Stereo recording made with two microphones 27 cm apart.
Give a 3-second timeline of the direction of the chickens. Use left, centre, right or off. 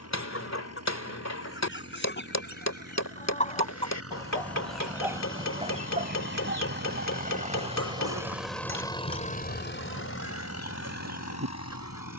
left, centre, right, right.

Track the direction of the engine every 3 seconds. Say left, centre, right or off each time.
right, right, right, left.